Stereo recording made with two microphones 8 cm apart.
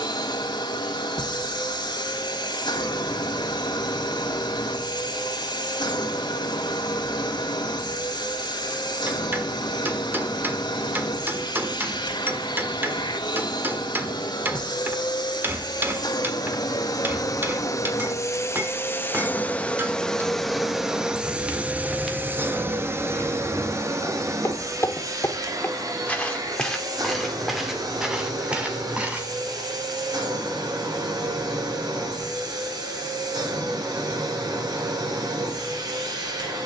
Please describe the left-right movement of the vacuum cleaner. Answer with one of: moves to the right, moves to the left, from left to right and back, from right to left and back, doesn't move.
moves to the right.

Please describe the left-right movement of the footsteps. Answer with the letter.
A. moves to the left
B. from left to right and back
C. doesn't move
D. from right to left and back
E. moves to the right
D.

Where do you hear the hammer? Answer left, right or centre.
right.